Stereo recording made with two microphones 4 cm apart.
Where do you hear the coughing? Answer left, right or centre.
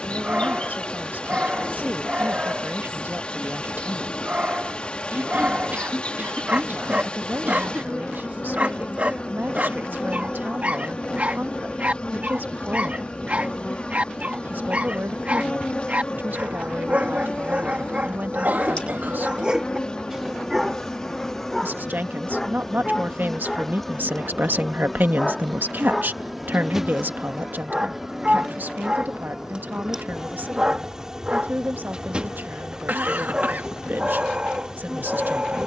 right.